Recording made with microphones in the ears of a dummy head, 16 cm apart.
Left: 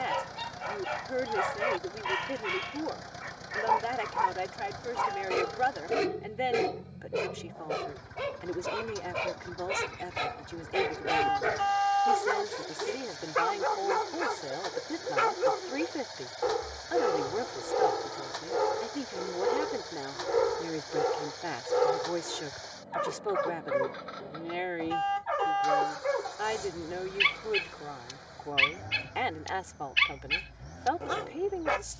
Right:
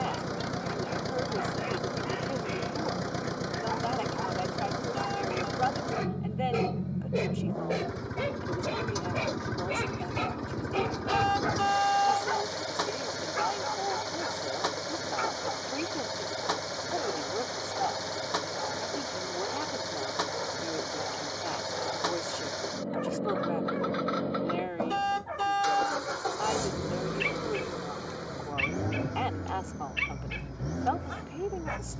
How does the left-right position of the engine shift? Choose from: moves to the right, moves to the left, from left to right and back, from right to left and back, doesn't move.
doesn't move.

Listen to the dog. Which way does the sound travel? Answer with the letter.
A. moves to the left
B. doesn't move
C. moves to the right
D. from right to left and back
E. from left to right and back
E.